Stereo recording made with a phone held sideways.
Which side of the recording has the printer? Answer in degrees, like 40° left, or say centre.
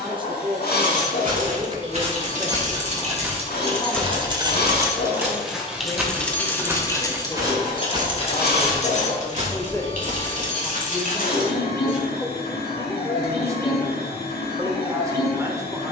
90° left.